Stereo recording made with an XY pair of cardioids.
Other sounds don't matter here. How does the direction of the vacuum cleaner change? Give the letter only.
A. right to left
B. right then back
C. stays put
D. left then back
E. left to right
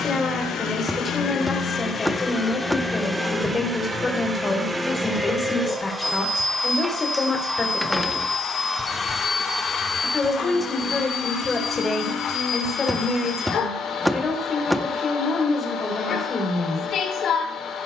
B.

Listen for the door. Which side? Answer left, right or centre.
centre.